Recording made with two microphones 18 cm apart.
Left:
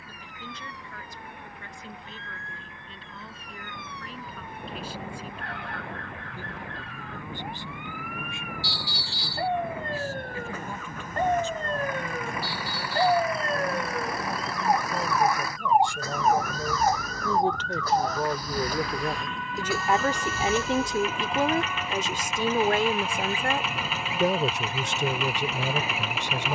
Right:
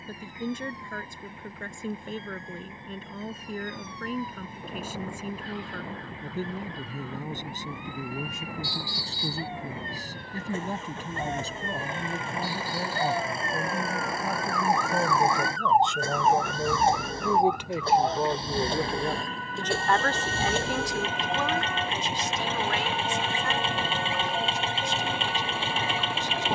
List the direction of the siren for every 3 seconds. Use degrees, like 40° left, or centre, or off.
70° left, 70° left, 60° left, 50° left, 30° left, centre, 40° right, 60° right, 70° right.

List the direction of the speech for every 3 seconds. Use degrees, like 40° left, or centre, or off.
50° right, 50° right, 40° right, 40° right, 30° right, 20° right, 10° left, 50° left, 80° left.